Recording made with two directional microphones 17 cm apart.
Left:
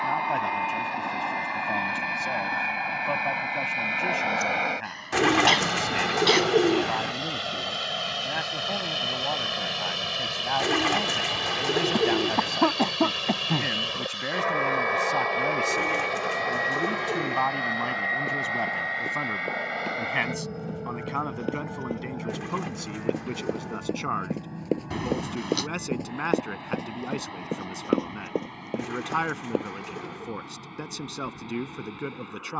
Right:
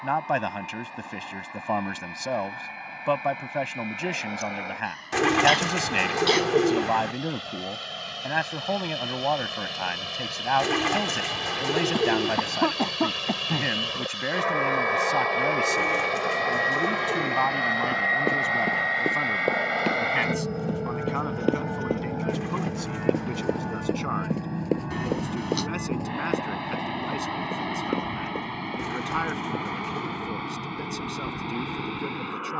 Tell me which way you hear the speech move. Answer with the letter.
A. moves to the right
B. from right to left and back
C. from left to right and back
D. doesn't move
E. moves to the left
E.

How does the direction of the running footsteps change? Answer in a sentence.
You can hear the running footsteps go from the right side to the left.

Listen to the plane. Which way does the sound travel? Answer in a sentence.
In this clip you hear the plane travel towards the right.